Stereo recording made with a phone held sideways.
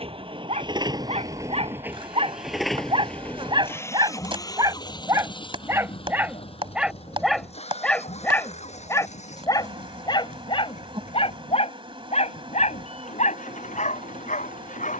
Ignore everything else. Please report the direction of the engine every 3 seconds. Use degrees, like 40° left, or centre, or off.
20° right, 30° left, 50° left, 60° left, 60° left.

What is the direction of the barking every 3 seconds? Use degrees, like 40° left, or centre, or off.
50° right, 30° right, centre, 40° left, 60° left.